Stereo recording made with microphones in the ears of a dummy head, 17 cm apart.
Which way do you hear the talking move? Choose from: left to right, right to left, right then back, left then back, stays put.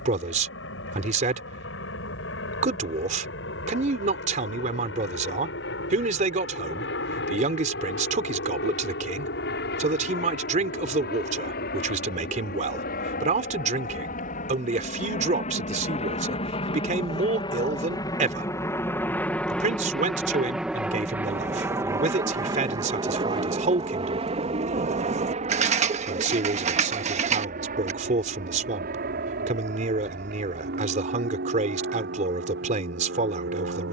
stays put.